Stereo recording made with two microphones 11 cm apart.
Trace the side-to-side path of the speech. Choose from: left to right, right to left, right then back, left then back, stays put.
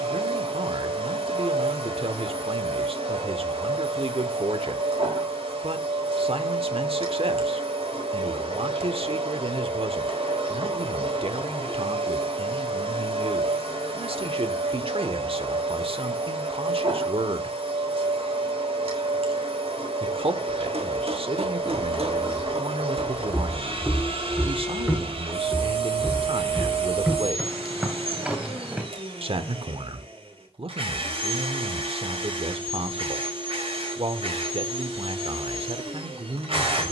stays put.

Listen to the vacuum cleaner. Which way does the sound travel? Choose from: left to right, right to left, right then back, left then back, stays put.
stays put.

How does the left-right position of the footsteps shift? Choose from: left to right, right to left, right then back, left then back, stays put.
left to right.